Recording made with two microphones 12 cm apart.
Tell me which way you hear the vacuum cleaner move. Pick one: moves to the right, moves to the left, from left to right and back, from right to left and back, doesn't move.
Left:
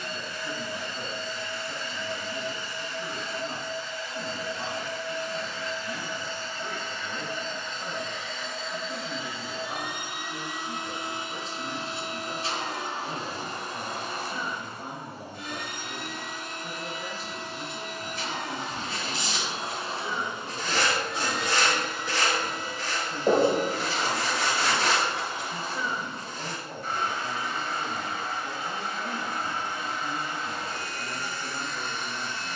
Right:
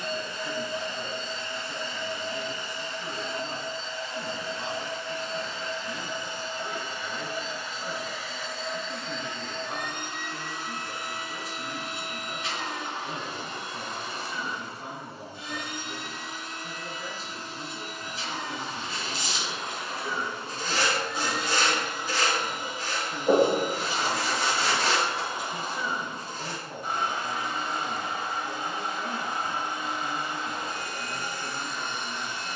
from right to left and back.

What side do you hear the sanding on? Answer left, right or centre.
left.